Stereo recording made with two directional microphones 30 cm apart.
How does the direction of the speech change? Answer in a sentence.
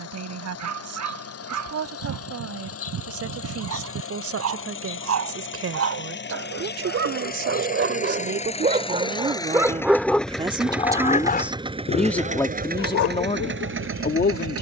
In this clip you hear the speech go from the right side to the left.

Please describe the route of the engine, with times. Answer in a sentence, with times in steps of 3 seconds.
You can hear the engine on the left from 0 s, in the centre from 9 s and on the right from 12 s.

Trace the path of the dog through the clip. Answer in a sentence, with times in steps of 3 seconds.
You can hear the dog on the right from 0 s, in the centre from 9 s and on the left from 12 s.